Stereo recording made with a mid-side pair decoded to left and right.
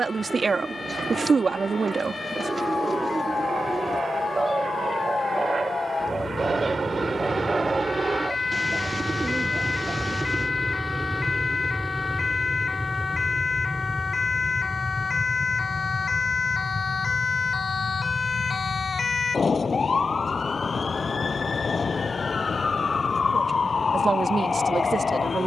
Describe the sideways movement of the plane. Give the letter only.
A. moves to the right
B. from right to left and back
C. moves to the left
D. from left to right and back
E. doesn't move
C.